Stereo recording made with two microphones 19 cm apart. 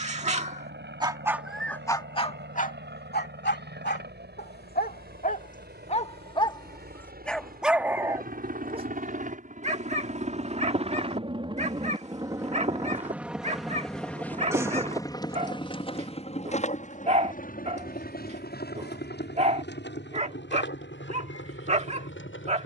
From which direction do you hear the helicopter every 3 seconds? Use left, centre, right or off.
right, right, right, right, centre, left, left, left.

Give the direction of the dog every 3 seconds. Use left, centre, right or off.
centre, left, centre, right, right, right, right, right.